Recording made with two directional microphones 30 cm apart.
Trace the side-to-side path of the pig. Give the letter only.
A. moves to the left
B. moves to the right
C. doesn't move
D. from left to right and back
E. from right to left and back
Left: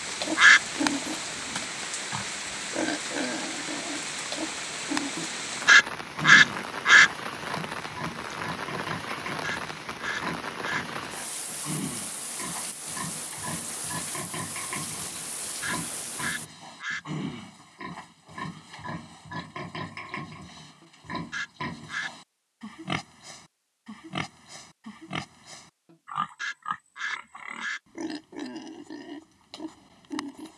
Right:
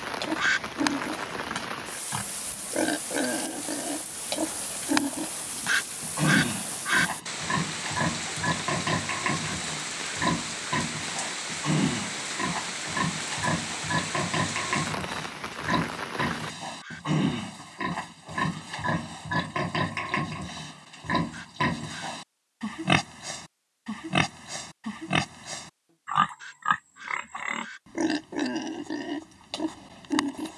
B.